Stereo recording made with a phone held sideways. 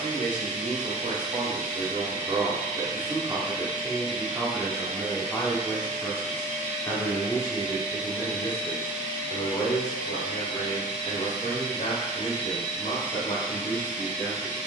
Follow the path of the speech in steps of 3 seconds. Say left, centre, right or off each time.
right, centre, left, left, left.